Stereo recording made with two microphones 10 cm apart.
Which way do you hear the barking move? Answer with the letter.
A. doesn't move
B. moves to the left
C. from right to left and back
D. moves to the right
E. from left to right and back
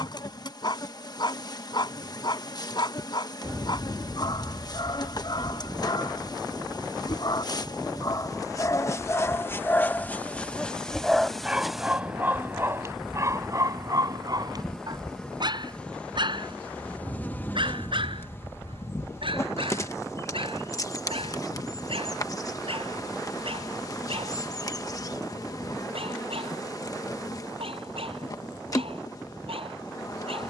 D.